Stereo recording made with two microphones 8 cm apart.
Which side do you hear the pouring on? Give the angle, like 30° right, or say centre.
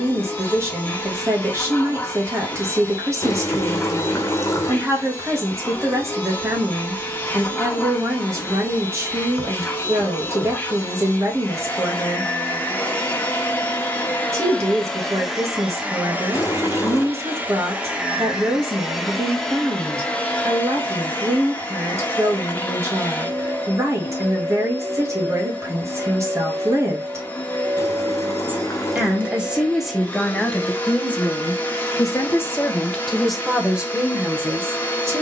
30° left.